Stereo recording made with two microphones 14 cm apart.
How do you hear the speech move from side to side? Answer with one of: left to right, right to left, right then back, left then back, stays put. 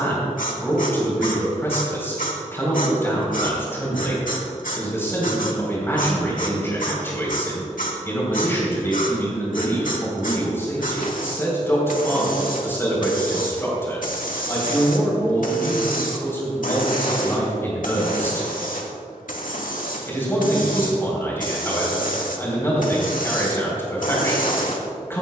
stays put.